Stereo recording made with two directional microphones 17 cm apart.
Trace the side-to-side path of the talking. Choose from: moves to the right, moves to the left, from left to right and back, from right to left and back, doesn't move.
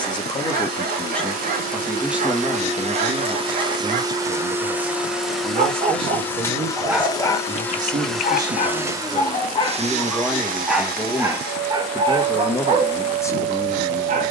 from left to right and back.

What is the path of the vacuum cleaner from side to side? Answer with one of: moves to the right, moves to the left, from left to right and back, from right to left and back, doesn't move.
from right to left and back.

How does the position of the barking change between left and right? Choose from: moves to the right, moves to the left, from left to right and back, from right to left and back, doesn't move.
from right to left and back.